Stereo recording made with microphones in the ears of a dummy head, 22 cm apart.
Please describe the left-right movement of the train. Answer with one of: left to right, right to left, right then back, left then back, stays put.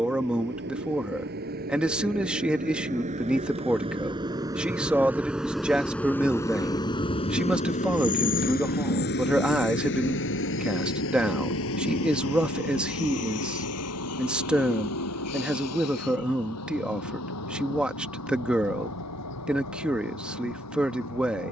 right to left.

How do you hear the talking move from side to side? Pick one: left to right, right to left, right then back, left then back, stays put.
stays put.